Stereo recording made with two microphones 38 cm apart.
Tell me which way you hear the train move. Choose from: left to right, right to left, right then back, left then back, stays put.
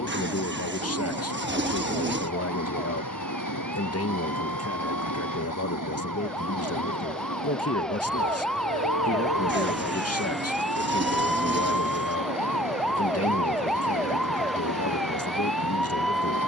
stays put.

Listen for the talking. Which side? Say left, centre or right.
left.